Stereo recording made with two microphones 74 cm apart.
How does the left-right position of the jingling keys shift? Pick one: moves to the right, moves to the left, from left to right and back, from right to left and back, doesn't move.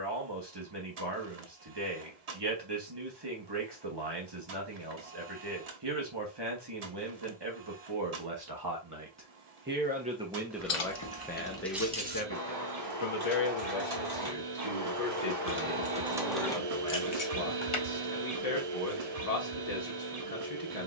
from left to right and back.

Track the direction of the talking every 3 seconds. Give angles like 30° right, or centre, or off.
30° right, 30° right, 30° right, centre, 50° left, 50° left, 50° left.